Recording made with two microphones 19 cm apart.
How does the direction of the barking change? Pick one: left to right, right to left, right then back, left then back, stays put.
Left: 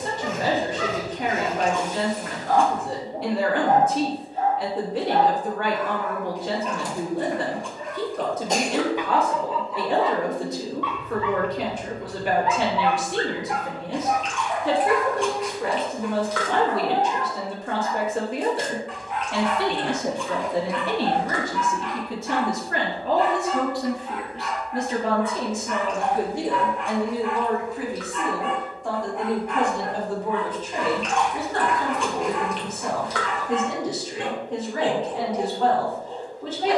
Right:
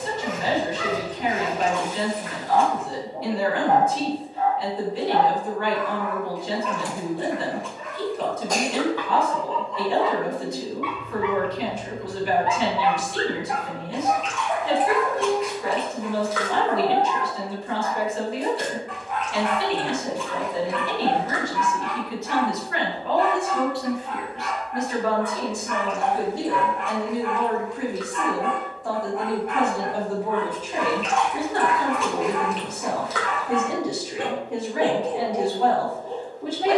left to right.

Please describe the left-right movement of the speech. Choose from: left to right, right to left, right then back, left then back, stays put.
left to right.